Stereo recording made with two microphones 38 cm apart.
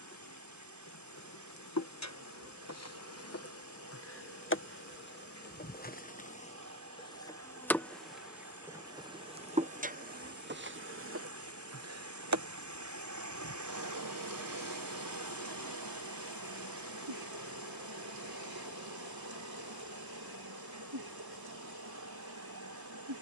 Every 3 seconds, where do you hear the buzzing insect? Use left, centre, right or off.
left, left, centre, right, right, right, right, right.